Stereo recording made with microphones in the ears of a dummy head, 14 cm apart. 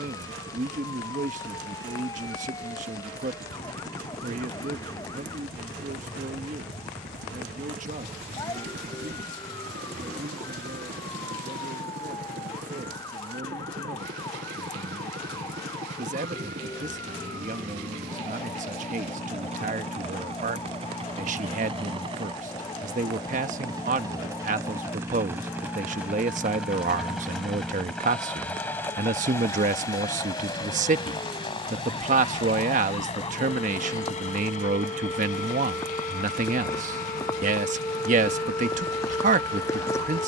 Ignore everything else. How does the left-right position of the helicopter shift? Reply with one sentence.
You can hear the helicopter go from the right side to the left.